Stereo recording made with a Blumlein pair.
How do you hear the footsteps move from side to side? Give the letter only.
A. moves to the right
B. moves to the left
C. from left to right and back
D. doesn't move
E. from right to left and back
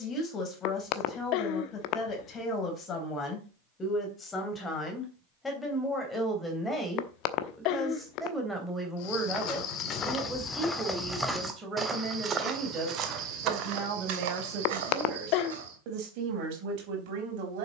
A.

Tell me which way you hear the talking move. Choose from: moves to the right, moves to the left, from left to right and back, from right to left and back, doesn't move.
moves to the right.